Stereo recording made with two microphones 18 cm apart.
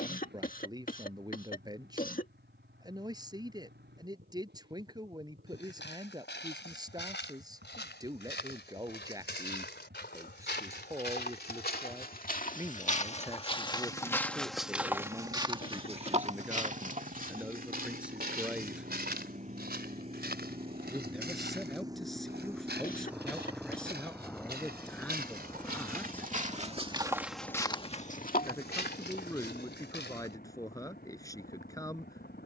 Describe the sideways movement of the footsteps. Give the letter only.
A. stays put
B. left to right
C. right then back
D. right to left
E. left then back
C.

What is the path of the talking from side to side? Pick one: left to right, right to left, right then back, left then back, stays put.
right to left.